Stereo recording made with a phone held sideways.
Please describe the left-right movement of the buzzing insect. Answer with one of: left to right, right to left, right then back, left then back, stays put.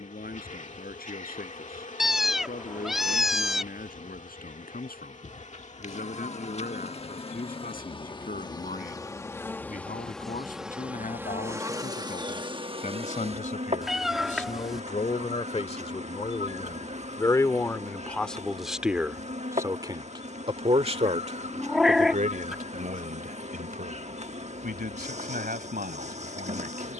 left to right.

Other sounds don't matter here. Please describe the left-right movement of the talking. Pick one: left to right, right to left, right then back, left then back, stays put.
left to right.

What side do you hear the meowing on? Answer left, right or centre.
centre.